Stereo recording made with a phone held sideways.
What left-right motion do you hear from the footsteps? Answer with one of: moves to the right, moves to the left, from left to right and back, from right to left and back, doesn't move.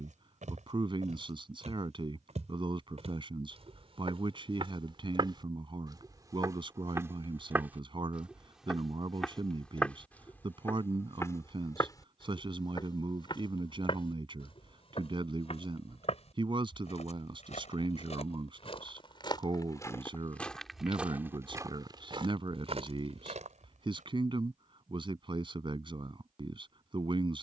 from right to left and back.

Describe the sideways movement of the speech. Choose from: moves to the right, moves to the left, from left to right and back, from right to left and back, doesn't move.
doesn't move.